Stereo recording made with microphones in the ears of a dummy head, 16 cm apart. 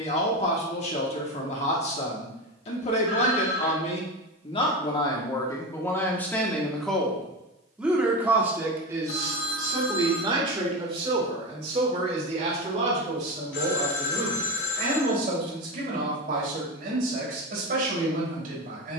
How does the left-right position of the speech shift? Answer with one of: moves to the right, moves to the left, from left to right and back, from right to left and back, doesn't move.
moves to the right.